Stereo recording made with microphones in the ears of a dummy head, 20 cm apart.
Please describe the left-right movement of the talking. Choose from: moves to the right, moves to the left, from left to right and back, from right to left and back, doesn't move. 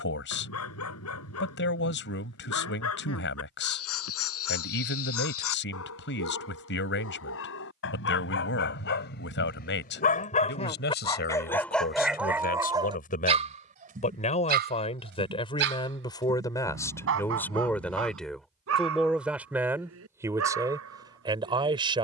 moves to the right.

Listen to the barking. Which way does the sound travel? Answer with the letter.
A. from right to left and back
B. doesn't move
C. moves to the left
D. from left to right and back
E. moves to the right
E.